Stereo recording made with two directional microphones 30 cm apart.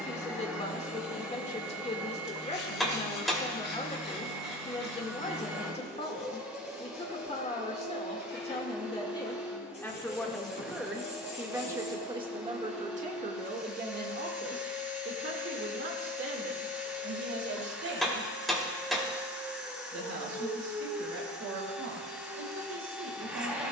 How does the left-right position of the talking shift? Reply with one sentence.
In this clip you hear the talking go from the left side to the right.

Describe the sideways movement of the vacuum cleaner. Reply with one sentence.
You can hear the vacuum cleaner stay put.